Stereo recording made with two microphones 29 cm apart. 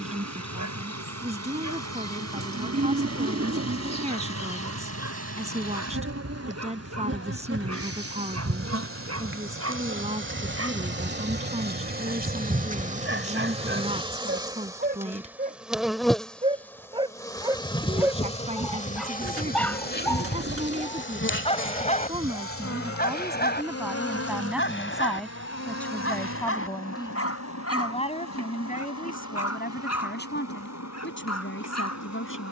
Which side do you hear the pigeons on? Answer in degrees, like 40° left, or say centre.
50° right.